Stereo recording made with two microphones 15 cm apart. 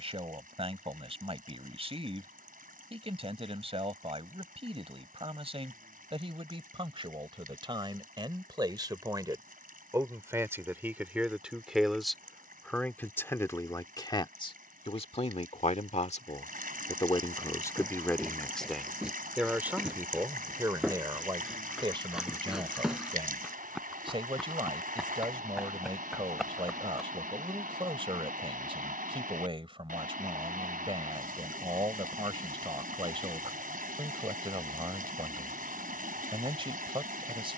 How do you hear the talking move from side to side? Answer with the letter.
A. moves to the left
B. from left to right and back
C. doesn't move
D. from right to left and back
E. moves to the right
D.